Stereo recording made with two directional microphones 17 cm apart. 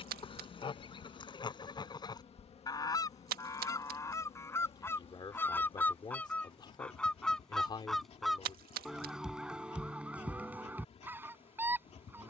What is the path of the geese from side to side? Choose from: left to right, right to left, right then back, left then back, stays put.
left to right.